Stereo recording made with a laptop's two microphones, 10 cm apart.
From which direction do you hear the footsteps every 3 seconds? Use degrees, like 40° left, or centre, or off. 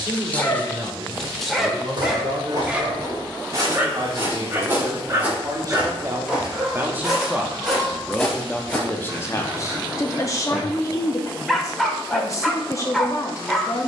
40° right, 20° right, centre, off, off.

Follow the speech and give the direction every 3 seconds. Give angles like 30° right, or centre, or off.
60° right, 50° right, 10° right, 30° left, 30° left.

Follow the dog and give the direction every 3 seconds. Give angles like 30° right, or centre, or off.
centre, 20° right, 30° right, 10° right, centre.